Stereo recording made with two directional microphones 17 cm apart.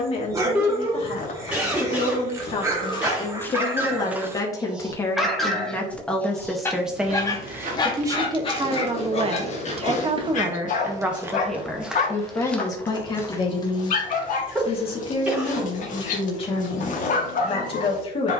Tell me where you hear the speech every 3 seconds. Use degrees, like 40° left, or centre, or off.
30° left, 20° left, 10° right, 20° right, 30° left, 30° left.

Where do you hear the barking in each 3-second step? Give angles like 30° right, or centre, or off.
20° right, 10° right, 20° left, 50° left, 50° left, 50° left.